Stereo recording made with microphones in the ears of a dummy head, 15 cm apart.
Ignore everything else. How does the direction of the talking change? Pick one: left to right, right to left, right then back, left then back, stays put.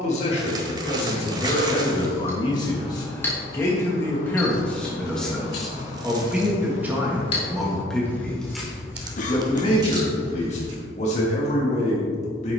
right then back.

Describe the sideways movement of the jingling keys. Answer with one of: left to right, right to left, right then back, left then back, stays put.
left then back.